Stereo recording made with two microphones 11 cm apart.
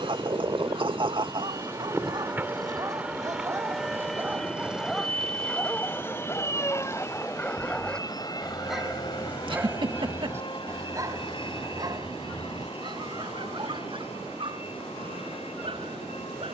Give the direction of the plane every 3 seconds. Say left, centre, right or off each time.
right, centre, left, left, left, left.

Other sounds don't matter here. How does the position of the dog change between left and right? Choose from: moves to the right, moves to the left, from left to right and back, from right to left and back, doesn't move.
from right to left and back.